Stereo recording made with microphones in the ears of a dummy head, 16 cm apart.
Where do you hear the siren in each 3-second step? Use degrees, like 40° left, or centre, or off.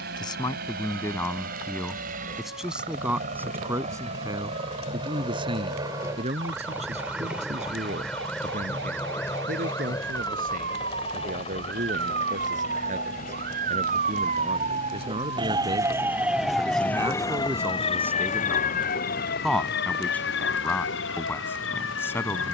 80° right, 70° right, 70° right, 60° right, 50° right, centre, 50° left, 70° left.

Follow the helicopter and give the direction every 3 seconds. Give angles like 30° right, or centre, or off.
50° right, 30° right, centre, 20° left, 40° left, 50° left, 60° left, 60° left.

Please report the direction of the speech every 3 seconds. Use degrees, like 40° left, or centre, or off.
10° left, 20° right, 40° right, 50° right, 40° right, 20° right, centre, 10° left.